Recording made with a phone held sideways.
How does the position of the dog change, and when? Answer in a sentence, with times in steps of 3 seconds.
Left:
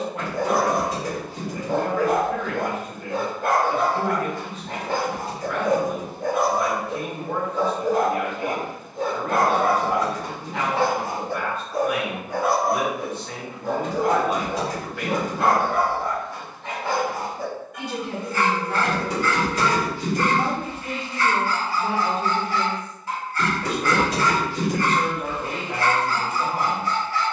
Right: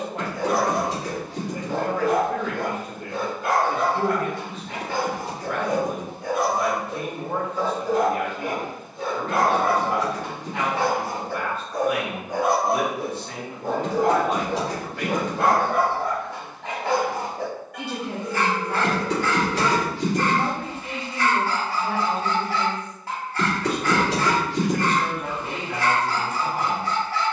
In this clip you hear the dog on the left from 0 s and on the right from 12 s.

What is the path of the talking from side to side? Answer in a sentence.
In this clip you hear the talking go from the right side to the left.